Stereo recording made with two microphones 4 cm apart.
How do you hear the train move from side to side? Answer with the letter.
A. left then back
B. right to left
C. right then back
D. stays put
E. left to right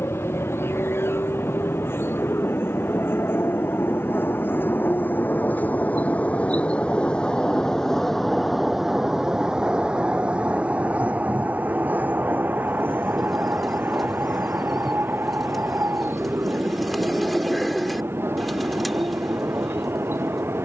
E.